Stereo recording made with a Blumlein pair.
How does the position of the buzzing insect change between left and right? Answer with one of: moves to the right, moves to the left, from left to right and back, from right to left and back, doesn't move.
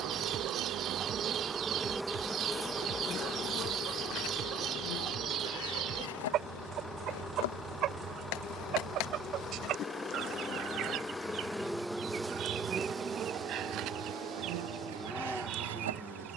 from right to left and back.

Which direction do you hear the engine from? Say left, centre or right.
centre.